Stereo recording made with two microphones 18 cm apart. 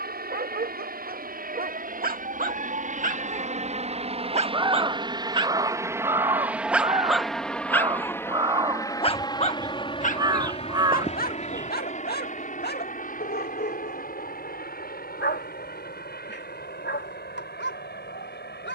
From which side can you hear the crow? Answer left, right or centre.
right.